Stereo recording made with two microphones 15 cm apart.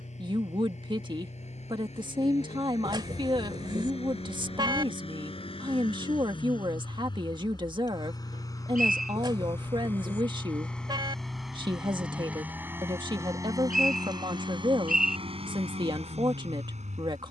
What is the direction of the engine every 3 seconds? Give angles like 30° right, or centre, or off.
50° left, 40° left, 30° left, 10° left, 20° right, 50° right.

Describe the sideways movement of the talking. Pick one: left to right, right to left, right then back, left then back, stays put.
stays put.